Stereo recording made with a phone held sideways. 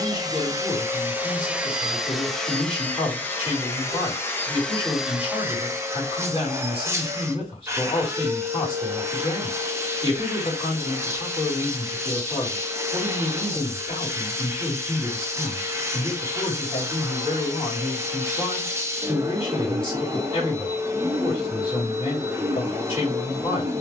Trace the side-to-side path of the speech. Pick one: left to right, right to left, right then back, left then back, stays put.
stays put.